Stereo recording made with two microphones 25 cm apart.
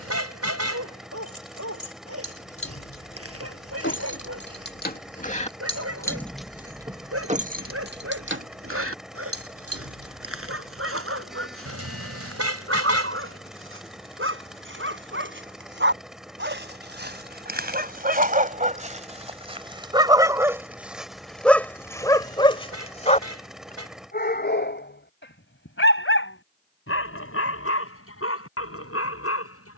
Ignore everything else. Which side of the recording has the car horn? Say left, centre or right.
right.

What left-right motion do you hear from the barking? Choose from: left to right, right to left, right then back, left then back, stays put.
right to left.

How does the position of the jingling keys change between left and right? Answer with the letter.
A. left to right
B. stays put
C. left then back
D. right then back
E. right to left
A.